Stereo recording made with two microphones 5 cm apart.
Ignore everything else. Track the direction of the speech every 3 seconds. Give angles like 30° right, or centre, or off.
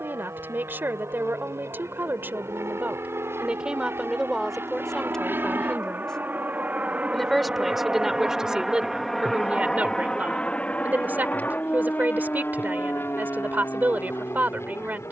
40° right, centre, 10° right, 30° right, 40° right.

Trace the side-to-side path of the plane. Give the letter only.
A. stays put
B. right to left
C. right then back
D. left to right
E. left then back
B.